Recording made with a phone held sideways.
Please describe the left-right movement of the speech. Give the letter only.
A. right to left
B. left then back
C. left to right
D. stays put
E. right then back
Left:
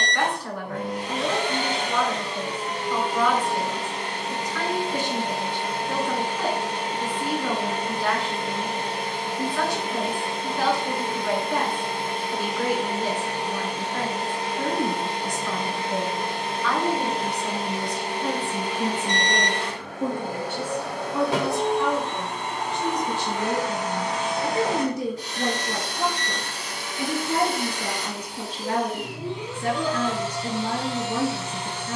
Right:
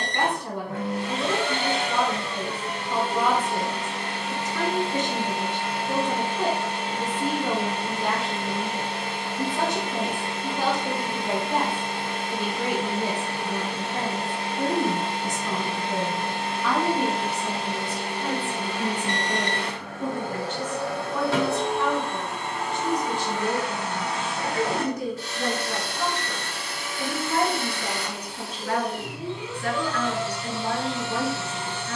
A.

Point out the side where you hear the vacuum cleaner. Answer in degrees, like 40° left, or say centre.
20° left.